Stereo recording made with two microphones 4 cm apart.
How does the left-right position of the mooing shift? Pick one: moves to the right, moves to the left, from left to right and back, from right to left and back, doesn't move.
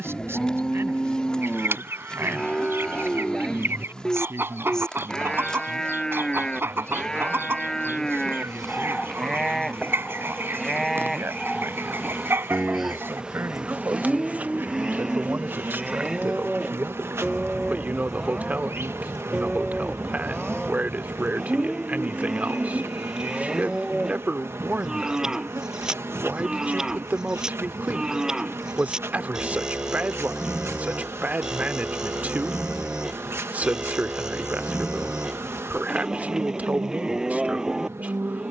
moves to the right.